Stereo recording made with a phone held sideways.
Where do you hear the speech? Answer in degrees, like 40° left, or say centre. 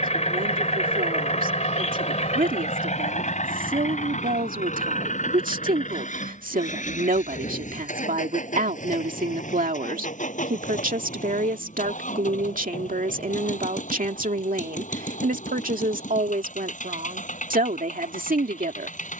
70° right.